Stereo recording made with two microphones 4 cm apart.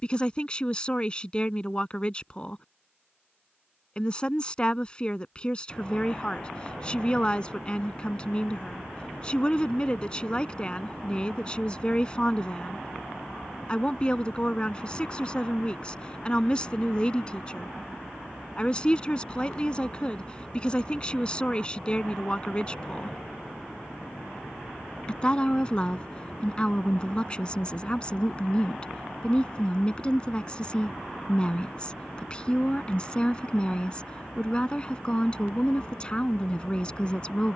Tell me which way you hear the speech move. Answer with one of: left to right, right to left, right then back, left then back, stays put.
stays put.